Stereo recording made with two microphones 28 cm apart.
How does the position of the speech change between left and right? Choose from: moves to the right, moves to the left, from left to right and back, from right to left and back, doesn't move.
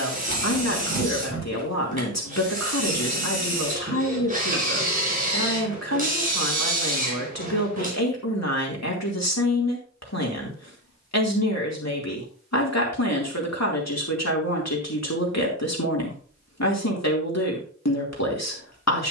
doesn't move.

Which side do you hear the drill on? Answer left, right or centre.
right.